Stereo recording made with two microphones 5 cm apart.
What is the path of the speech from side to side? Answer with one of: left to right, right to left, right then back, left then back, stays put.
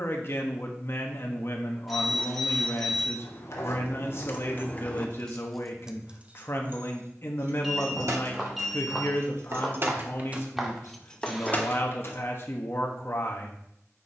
stays put.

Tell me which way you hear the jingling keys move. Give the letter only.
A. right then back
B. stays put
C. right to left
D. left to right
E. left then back
A.